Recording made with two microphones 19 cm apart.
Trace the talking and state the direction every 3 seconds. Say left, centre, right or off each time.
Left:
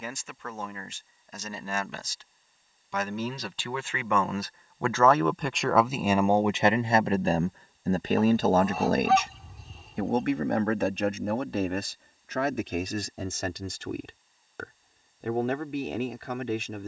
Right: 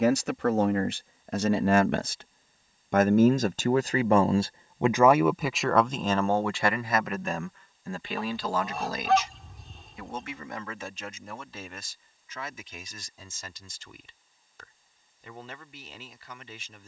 right, right, left, left, left, left.